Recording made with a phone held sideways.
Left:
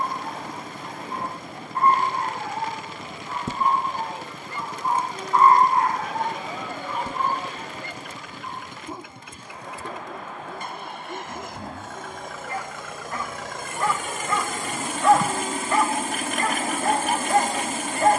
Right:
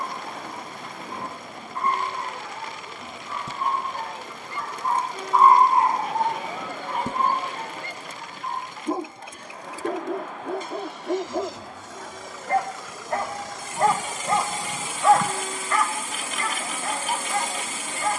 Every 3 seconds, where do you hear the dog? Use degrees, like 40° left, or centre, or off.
60° left, 20° left, 50° right, 70° right, 40° right, 40° left.